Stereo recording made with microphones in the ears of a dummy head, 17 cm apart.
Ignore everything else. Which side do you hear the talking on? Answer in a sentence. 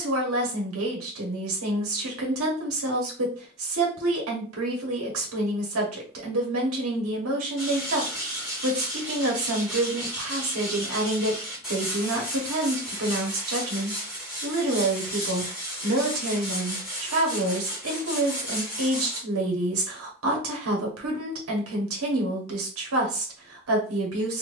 In this clip you hear the talking on the right.